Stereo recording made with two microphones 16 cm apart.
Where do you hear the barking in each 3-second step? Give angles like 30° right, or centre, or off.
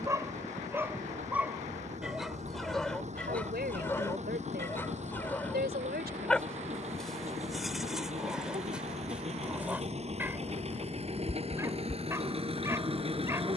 10° right, 10° left, centre, 10° right, 20° right.